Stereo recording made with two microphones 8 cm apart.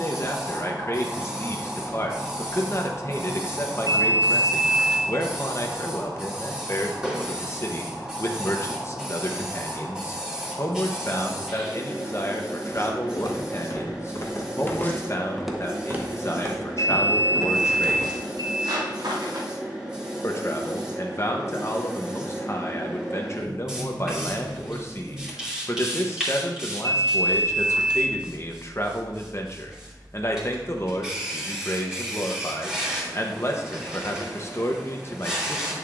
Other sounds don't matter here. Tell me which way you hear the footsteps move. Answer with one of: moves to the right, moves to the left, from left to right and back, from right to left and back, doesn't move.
moves to the right.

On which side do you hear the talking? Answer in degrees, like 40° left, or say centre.
40° left.